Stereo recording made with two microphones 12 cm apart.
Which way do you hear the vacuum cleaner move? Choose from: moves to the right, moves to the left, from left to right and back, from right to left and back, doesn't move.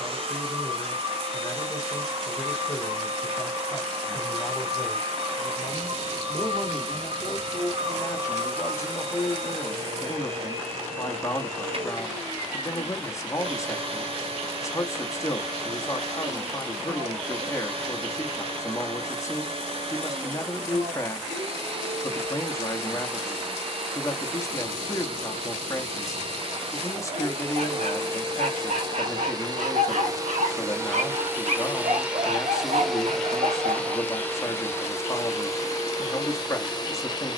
moves to the left.